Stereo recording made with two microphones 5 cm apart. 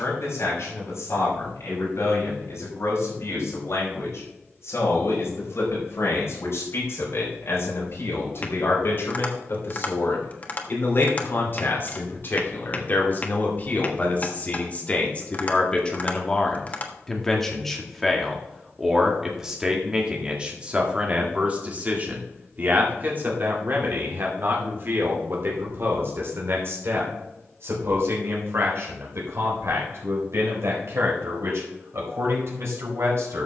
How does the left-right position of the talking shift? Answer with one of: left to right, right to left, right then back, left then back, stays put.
left to right.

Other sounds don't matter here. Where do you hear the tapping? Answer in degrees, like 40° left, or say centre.
40° left.